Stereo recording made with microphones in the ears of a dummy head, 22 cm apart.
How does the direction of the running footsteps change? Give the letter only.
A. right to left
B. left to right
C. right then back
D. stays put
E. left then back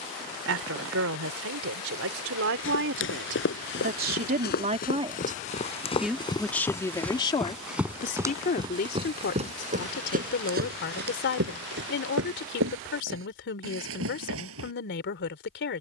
B.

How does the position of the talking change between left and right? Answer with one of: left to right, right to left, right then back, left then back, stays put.
right to left.